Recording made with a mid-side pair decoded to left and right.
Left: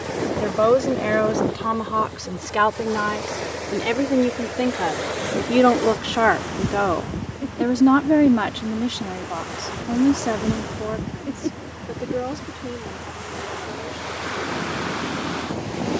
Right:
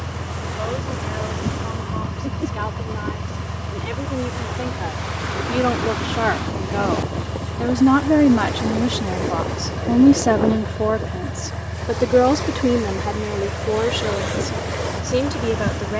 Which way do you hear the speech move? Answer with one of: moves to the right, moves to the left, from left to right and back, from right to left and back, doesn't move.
moves to the right.